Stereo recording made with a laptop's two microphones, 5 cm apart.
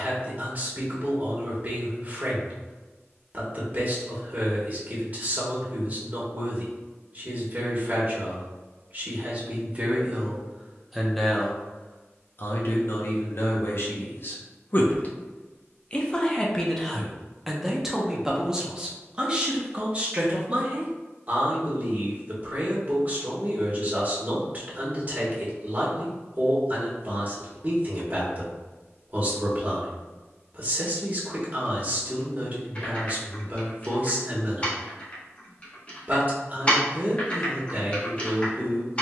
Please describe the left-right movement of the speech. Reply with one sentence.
You can hear the speech go left and come back.